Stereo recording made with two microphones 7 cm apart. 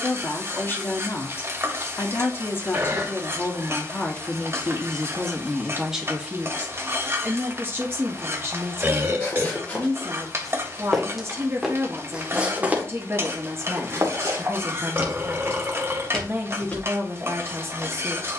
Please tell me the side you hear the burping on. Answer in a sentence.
In this clip you hear the burping on the right.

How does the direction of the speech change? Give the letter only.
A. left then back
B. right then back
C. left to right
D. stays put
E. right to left
C.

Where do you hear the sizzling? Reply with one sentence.
In this clip you hear the sizzling on the right.